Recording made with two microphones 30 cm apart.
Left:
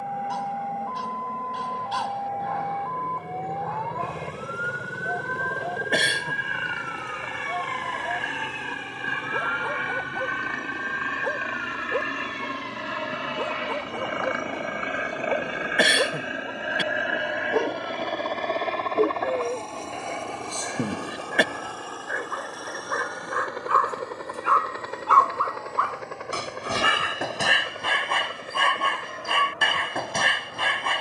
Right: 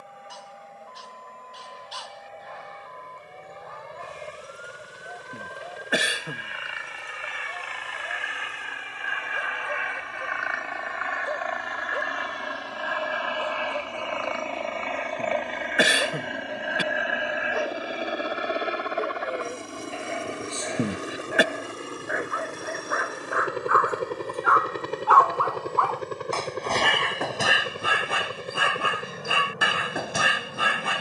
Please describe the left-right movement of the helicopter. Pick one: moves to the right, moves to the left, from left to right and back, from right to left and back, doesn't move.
moves to the right.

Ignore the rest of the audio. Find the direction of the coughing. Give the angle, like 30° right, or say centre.
centre.